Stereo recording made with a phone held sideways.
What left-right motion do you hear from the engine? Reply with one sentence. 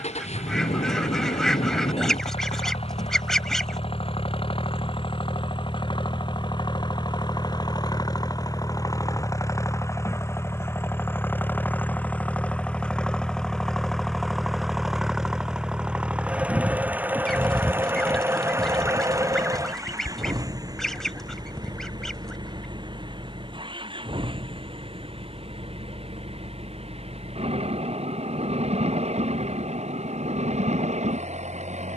In this clip you hear the engine go from the left side to the right.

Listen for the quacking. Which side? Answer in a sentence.
You can hear the quacking in the centre.